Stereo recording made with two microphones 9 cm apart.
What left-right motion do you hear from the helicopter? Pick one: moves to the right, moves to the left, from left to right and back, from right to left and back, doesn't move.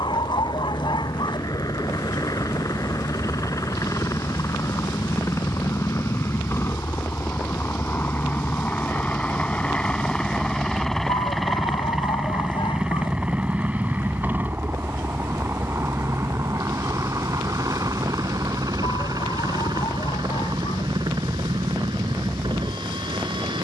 moves to the right.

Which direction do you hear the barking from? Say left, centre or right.
left.